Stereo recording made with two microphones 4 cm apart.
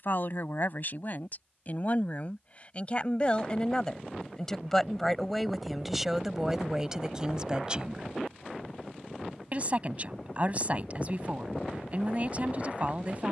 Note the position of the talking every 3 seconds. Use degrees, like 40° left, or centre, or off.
40° left, 10° left, 20° right, 40° right, 40° right.